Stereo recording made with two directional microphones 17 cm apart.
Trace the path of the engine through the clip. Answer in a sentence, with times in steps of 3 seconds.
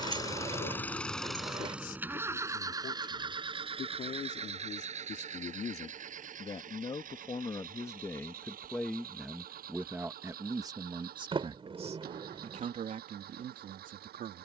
You can hear the engine in the centre from 0 s and on the right from 3 s.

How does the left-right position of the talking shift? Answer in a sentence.
You can hear the talking travel towards the right.